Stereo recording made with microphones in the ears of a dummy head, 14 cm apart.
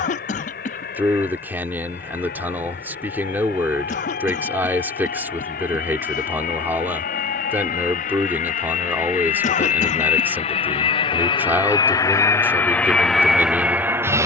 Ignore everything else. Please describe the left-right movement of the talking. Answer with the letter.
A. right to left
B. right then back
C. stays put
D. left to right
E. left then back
C.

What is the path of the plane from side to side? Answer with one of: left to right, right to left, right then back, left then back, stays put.
left to right.